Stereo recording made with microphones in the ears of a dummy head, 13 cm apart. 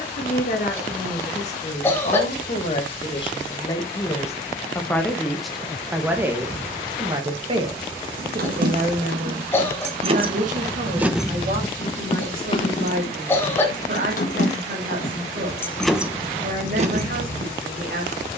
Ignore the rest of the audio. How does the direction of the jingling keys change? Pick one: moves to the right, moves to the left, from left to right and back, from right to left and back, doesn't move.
from right to left and back.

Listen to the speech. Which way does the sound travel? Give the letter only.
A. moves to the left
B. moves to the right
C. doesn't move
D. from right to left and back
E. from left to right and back
B.